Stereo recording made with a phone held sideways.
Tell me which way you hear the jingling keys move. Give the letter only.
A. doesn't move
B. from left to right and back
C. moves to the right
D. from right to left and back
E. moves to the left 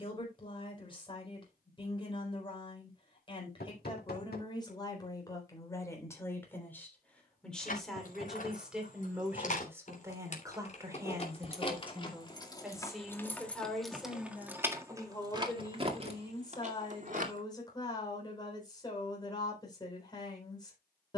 C.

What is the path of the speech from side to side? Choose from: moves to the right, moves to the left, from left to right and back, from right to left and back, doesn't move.
from left to right and back.